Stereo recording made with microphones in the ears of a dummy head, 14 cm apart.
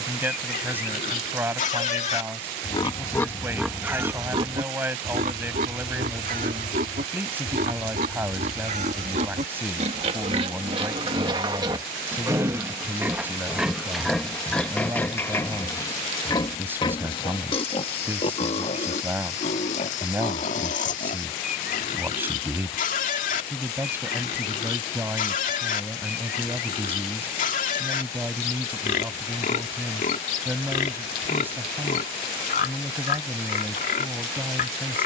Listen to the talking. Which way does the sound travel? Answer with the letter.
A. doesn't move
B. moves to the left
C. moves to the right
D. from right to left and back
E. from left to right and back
A.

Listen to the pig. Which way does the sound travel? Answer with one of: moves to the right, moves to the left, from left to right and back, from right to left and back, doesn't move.
from left to right and back.